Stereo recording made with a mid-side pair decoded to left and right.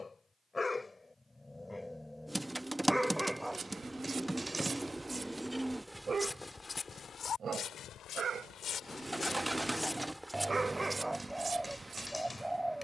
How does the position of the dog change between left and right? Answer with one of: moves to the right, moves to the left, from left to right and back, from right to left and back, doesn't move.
from left to right and back.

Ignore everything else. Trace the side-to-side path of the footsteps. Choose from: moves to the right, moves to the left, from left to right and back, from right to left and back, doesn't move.
from right to left and back.